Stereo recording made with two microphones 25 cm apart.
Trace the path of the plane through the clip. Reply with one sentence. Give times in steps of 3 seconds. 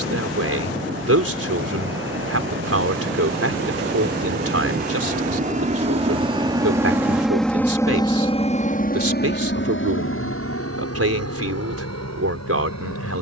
In this clip you hear the plane on the right from 0 s, in the centre from 6 s and on the left from 9 s.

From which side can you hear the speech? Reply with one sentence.
In this clip you hear the speech on the right.